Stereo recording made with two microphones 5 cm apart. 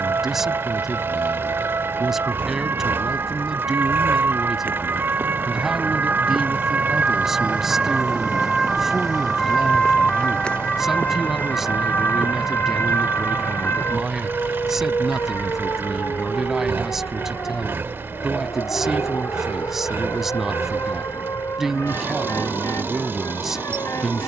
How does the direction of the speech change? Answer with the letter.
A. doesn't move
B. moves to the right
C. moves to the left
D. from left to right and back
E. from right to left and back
A.